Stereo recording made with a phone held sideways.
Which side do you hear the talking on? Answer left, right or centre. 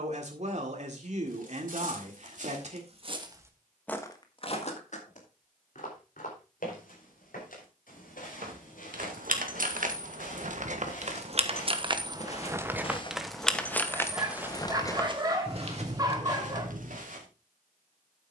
right.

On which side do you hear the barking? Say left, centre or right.
right.